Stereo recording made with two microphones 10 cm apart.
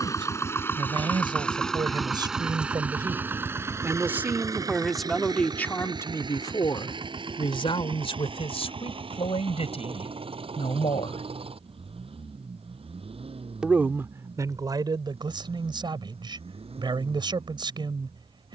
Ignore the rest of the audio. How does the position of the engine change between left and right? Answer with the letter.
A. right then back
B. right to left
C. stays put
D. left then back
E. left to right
E.